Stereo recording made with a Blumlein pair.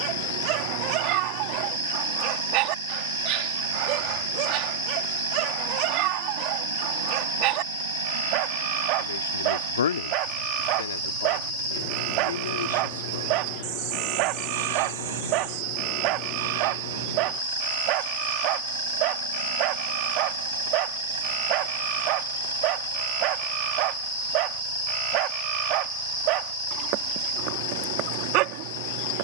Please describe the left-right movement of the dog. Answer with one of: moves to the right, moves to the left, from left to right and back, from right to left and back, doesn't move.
doesn't move.